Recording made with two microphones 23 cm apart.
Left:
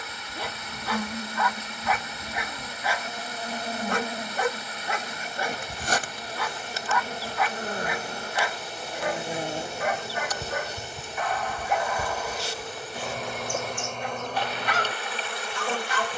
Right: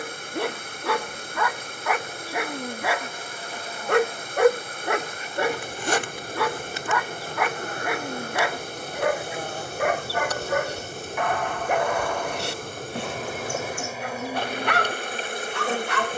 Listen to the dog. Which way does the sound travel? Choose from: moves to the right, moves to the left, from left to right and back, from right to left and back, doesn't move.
doesn't move.